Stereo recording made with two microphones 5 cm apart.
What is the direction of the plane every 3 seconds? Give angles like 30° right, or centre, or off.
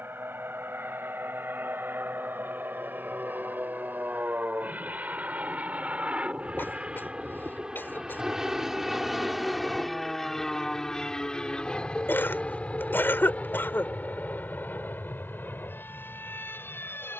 60° right, 40° right, 20° right, 10° left, 30° left, 40° left.